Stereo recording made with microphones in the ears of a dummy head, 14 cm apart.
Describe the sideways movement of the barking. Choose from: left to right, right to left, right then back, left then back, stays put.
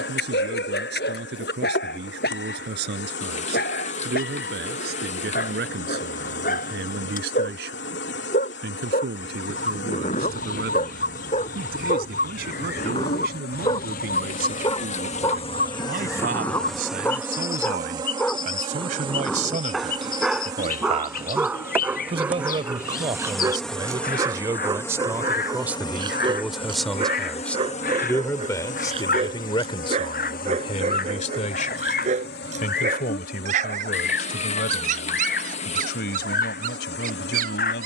left to right.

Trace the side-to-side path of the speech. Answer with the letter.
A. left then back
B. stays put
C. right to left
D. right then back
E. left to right
C.